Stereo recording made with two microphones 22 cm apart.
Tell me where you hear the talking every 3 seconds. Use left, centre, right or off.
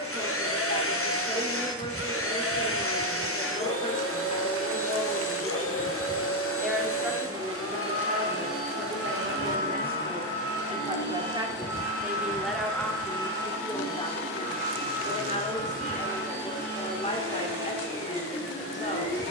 left, left, right, right, centre, left, left.